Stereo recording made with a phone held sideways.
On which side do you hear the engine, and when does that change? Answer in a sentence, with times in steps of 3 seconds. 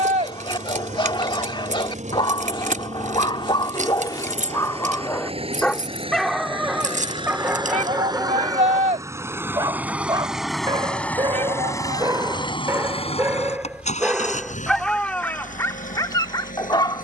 You can hear the engine on the right from 0 s, in the centre from 9 s and on the left from 12 s.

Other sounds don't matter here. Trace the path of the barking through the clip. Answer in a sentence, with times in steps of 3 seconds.
In this clip you hear the barking on the left from 0 s, in the centre from 6 s, on the right from 9 s, in the centre from 12 s and on the left from 15 s.